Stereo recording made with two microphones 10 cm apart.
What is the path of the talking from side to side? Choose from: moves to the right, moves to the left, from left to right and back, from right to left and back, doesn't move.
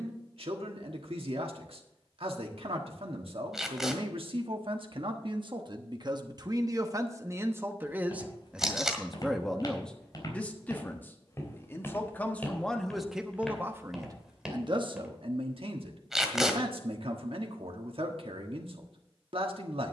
from right to left and back.